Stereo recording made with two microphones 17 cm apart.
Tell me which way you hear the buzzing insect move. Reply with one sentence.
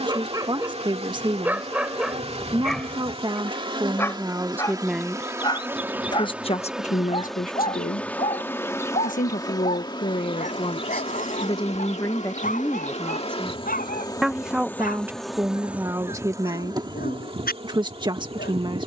You can hear the buzzing insect go left and come back.